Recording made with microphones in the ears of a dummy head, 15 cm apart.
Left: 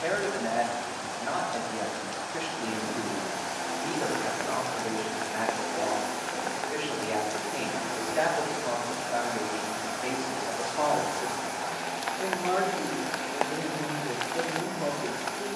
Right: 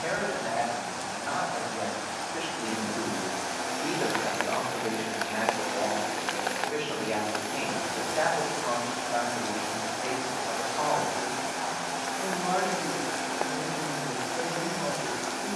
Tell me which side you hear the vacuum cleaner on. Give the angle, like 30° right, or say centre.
40° right.